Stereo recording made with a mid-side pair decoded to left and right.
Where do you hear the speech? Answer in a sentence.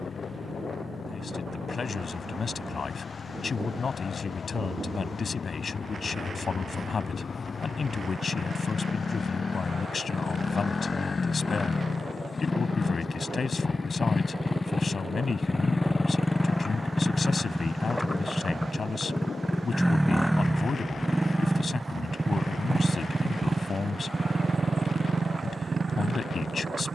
You can hear the speech on the left.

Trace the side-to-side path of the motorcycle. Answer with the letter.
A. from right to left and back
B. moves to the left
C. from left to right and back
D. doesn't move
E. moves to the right
E.